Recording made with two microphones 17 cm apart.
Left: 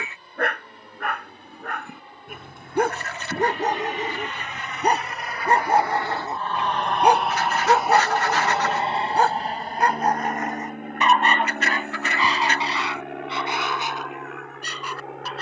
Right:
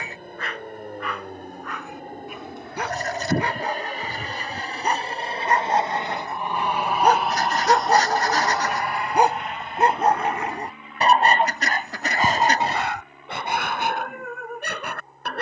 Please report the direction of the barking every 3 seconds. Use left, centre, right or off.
left, left, centre, right, right.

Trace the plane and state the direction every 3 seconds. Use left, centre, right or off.
right, right, centre, left, left.